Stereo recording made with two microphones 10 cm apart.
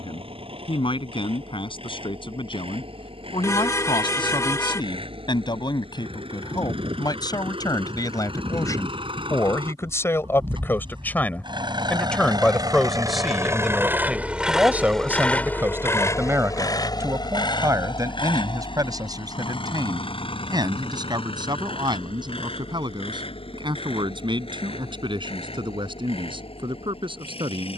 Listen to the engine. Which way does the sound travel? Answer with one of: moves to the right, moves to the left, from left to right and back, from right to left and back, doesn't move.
moves to the left.